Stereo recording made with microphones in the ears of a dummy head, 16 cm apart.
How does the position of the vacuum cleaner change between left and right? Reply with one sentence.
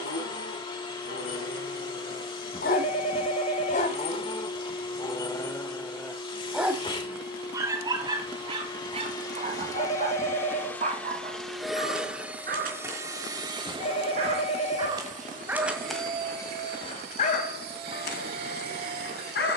In this clip you hear the vacuum cleaner travel towards the right.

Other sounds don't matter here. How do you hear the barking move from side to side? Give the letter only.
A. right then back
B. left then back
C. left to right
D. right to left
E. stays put
A.